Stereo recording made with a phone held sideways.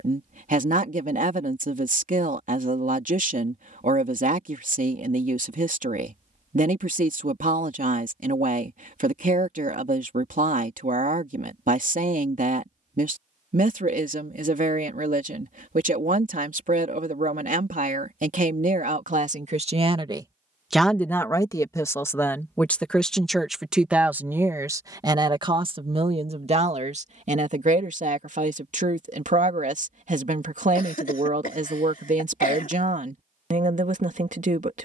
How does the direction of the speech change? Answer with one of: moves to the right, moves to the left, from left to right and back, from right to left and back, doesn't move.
from right to left and back.